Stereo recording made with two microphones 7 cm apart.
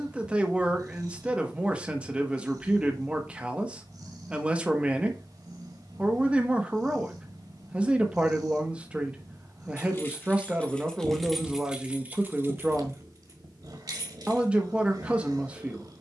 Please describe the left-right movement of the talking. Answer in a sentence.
You can hear the talking stay put.